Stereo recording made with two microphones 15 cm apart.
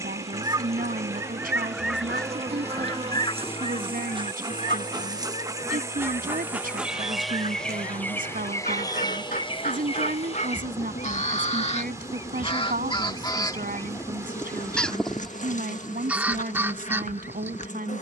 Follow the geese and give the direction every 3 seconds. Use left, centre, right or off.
centre, left, left, left, left, centre.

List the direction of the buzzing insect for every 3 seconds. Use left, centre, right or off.
right, right, centre, left, left, left.